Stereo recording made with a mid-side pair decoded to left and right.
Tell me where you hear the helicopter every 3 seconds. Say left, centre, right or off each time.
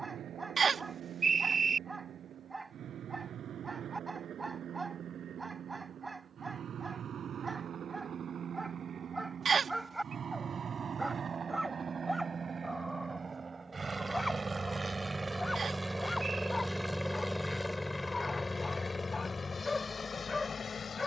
right, right, right, right, right, centre, left.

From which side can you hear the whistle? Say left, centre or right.
right.